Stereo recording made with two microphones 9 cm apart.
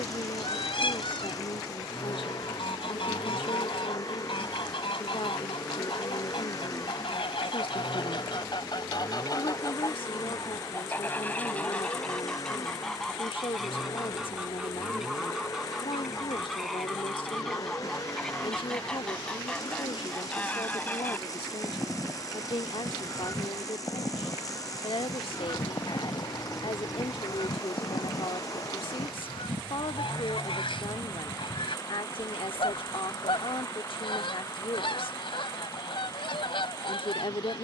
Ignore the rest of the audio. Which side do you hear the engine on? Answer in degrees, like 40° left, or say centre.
40° left.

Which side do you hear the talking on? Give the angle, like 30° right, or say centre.
70° left.